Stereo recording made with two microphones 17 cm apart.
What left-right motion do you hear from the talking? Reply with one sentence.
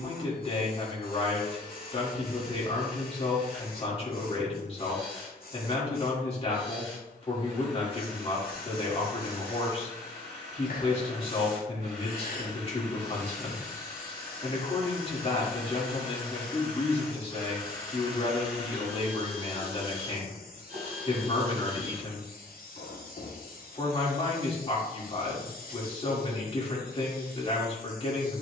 In this clip you hear the talking stay put.